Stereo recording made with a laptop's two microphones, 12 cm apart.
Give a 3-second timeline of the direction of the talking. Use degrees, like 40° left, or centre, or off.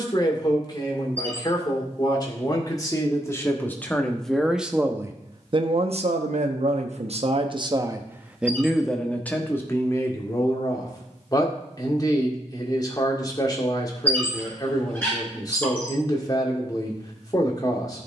30° left, 10° right, 40° right, 20° left, 30° left, 30° left.